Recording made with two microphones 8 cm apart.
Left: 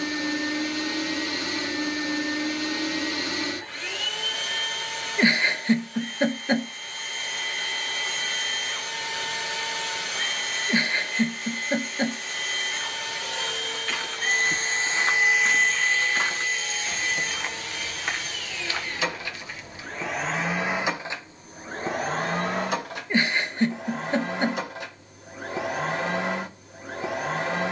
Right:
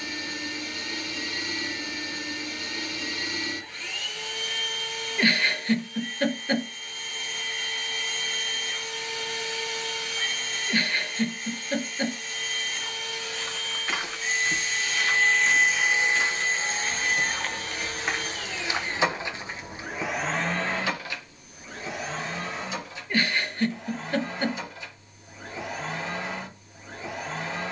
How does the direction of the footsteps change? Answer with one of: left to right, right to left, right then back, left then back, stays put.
left then back.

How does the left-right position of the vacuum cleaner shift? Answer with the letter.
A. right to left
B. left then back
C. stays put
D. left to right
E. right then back
E.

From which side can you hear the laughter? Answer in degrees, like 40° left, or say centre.
20° left.